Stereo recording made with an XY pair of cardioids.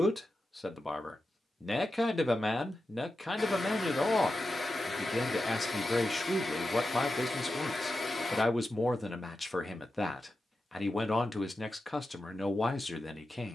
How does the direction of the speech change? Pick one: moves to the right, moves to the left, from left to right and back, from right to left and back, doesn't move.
doesn't move.